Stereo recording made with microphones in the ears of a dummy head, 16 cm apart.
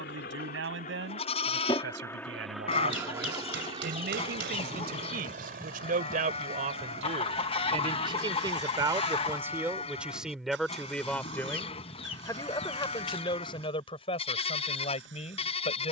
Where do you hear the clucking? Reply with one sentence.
You can hear the clucking on the left.